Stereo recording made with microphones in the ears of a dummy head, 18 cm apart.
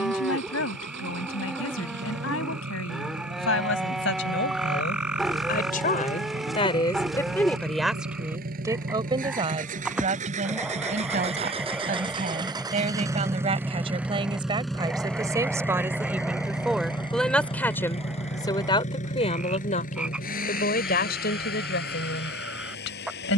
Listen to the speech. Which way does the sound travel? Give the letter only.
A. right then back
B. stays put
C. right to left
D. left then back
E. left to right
A.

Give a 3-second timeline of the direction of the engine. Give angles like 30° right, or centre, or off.
70° right, 60° right, 50° right, 40° right, 10° right, 20° left, 40° left, 60° left.